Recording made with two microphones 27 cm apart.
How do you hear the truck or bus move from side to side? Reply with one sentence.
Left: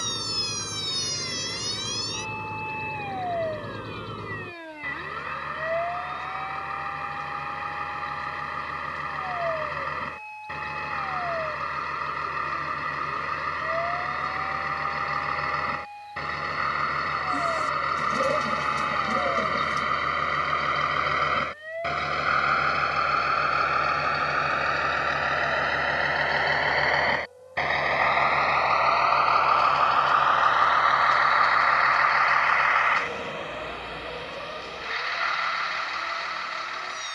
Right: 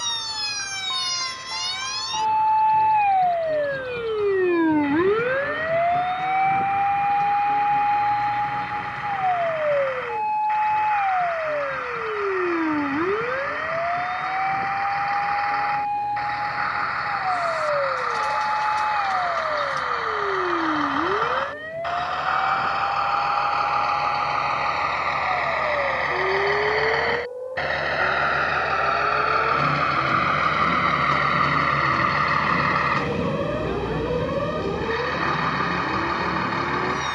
In this clip you hear the truck or bus move to the right.